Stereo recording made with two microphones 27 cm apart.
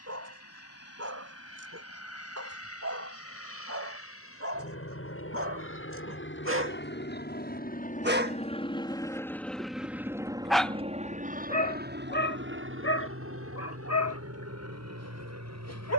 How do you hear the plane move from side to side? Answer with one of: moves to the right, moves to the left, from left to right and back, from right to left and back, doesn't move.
moves to the right.